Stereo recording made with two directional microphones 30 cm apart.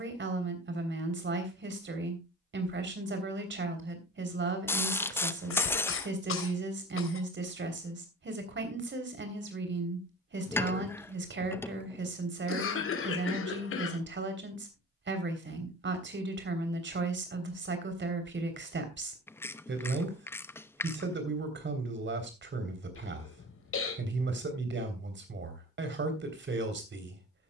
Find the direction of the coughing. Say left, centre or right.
left.